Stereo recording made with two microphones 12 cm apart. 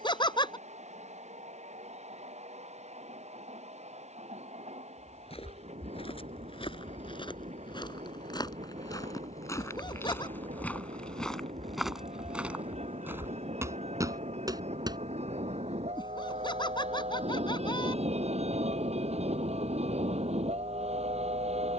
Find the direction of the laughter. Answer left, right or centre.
left.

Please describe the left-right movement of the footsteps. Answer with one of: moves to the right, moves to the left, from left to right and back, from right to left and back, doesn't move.
moves to the right.